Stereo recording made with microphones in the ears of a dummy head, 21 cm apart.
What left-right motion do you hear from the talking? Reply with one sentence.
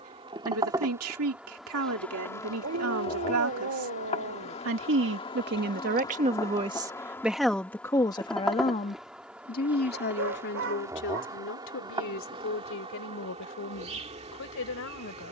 You can hear the talking go from the right side to the left.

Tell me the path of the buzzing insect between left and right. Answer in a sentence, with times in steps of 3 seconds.
In this clip you hear the buzzing insect in the centre from 0 s, on the left from 3 s, in the centre from 6 s and on the right from 12 s.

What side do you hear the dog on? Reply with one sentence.
In this clip you hear the dog on the right.